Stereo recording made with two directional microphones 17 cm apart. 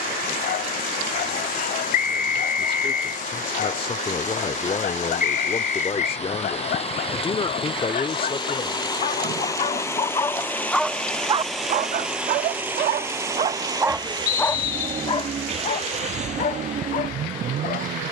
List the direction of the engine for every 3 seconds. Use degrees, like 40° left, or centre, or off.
50° left, 50° left, 30° left, 10° left, 20° right, 40° right.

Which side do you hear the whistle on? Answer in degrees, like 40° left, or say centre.
60° left.